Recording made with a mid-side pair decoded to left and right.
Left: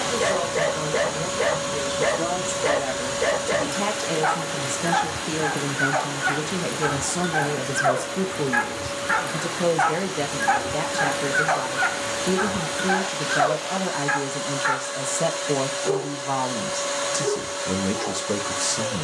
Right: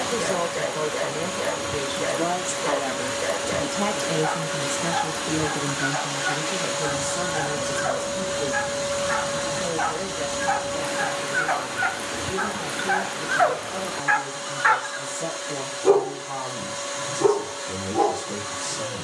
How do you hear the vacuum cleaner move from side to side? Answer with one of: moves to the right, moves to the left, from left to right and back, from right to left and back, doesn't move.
from left to right and back.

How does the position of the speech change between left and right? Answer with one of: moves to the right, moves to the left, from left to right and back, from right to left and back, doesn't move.
moves to the left.